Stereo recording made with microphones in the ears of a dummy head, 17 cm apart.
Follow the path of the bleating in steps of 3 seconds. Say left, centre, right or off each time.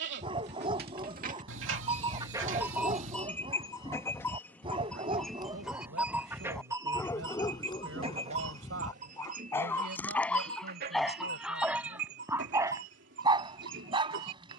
right, centre, right, right, right.